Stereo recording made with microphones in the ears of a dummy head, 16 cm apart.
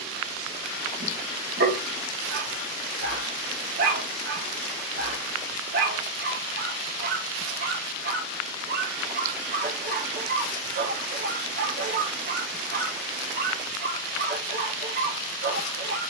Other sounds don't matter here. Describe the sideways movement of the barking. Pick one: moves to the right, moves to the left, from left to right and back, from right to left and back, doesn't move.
doesn't move.